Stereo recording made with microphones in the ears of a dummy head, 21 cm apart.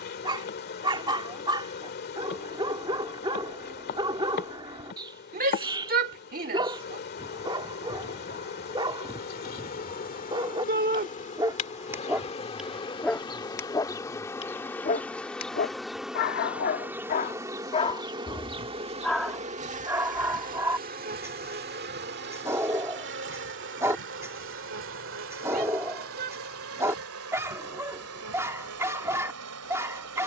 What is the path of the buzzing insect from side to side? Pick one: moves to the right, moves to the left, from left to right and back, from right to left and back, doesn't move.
moves to the right.